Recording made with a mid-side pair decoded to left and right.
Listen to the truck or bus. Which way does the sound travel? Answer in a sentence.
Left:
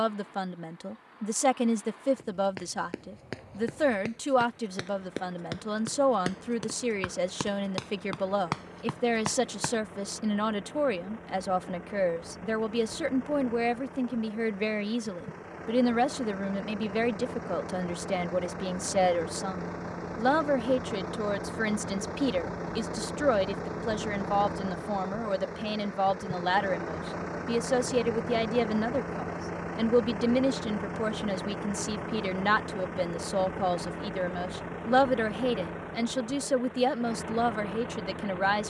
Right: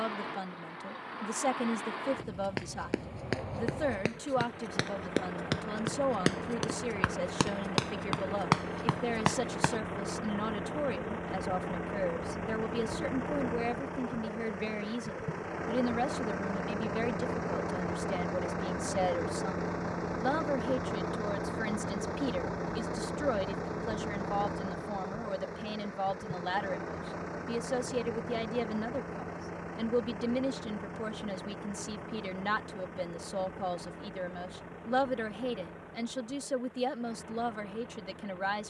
In this clip you hear the truck or bus move from right to left.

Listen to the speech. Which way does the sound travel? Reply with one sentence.
In this clip you hear the speech stay put.